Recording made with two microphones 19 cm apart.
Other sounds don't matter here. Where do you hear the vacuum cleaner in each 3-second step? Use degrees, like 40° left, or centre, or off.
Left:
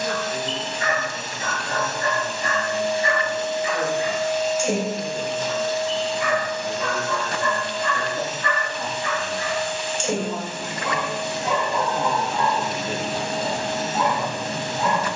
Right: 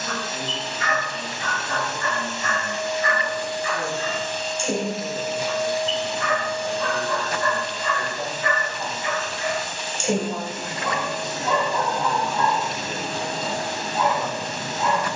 50° left, 10° left, 40° right, 40° right, 40° right.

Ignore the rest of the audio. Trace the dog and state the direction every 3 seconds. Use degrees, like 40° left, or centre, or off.
30° left, 20° left, centre, centre, 30° left.